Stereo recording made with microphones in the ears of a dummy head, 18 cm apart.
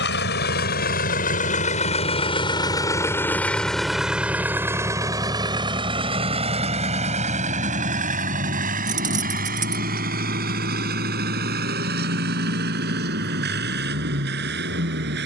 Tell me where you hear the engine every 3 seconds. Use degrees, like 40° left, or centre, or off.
40° left, 10° right, 40° right, 50° right, 60° right.